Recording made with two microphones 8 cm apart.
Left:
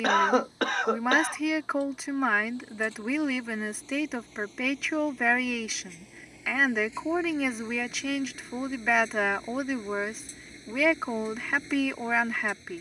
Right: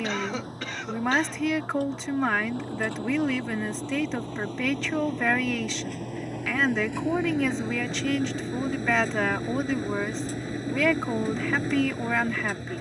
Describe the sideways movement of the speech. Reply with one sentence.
You can hear the speech stay in one place.